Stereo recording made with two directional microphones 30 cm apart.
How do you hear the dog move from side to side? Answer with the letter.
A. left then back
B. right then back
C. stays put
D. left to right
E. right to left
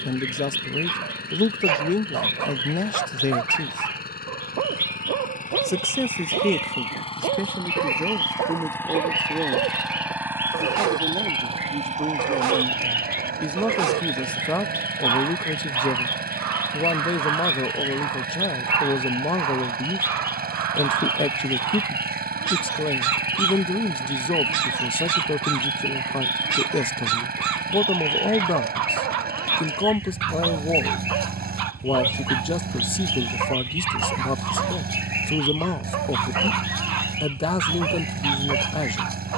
C.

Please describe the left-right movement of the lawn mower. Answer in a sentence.
In this clip you hear the lawn mower move from left to right.